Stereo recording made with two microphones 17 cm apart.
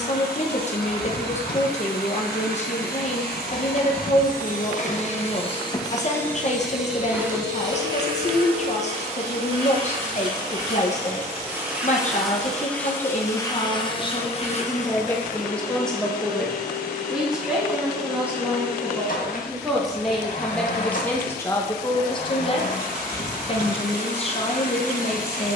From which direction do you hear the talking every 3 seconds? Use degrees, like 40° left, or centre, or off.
40° left, 40° left, 40° left, 40° left, 30° left, centre, centre, 30° left, 30° left.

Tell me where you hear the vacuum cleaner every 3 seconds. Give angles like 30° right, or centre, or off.
60° left, 50° left, 10° right, 20° right, 20° left, 50° left, 50° left, 50° left, 50° left.